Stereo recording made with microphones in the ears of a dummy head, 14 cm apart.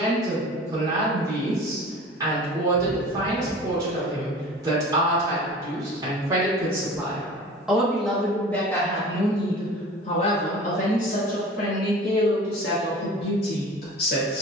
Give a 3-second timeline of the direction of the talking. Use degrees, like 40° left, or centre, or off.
20° right, 20° right, centre, 40° left, 70° left.